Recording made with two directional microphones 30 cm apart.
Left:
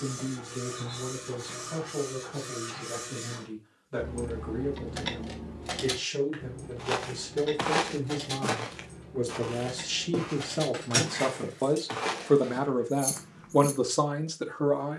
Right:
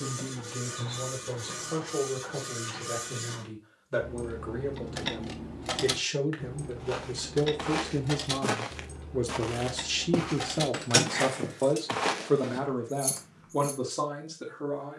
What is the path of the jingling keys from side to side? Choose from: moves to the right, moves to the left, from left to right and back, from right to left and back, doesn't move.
from left to right and back.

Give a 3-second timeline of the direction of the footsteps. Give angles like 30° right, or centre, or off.
off, off, 20° left, 40° right, 10° left.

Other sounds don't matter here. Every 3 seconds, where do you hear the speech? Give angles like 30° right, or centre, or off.
50° right, 40° right, 30° right, 10° right, 30° left.